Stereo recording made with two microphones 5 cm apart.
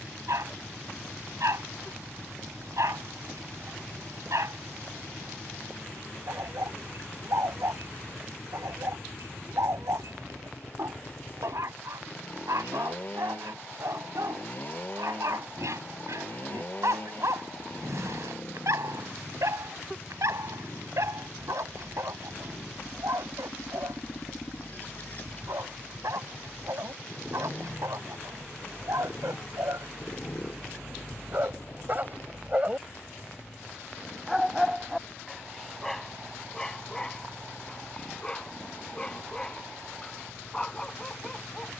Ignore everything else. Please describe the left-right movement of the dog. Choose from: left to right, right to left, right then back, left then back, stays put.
right to left.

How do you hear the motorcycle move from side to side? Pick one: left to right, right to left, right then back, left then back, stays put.
stays put.